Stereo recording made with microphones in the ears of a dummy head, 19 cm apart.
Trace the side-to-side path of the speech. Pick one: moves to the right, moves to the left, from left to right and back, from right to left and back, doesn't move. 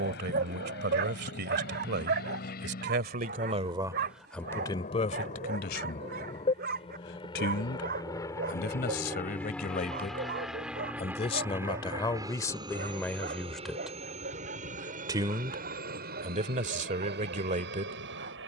from right to left and back.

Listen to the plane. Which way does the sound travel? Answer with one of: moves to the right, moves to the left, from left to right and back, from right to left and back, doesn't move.
moves to the right.